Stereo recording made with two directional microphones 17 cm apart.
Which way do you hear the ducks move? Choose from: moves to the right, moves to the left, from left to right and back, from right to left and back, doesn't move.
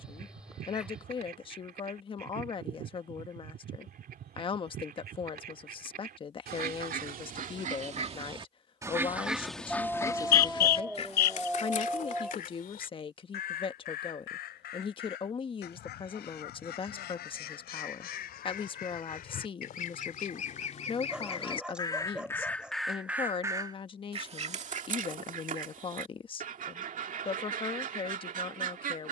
from right to left and back.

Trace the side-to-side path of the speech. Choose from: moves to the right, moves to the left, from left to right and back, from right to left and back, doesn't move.
doesn't move.